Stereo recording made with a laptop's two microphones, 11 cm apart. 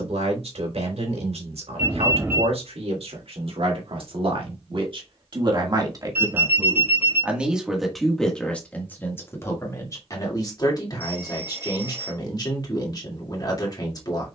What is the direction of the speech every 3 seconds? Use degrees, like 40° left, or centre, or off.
70° right, 50° right, 10° right, 30° left, 40° left.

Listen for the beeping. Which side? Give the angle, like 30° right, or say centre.
20° right.